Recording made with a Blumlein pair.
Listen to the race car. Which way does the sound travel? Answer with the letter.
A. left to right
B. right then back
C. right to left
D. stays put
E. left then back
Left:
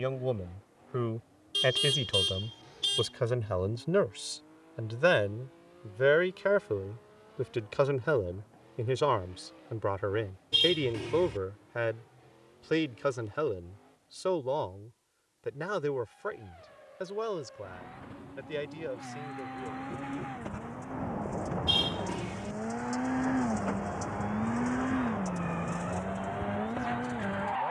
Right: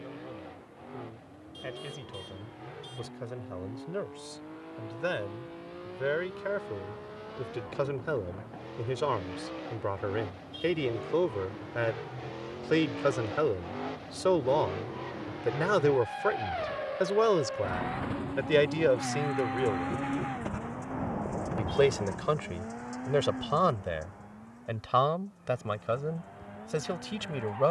C.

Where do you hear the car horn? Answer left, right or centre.
left.